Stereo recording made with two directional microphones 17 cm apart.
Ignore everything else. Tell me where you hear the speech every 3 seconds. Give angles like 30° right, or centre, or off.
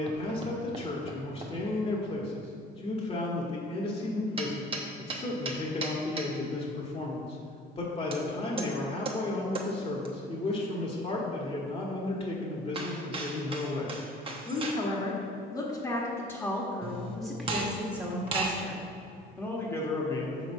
30° left, 30° left, 30° left, 30° left, 30° left, 10° left, 10° left.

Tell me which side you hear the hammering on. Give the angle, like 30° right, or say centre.
30° right.